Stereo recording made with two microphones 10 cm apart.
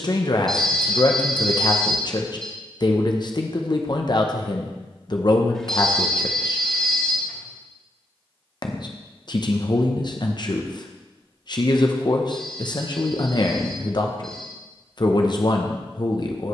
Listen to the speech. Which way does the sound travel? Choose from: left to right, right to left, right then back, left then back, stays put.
stays put.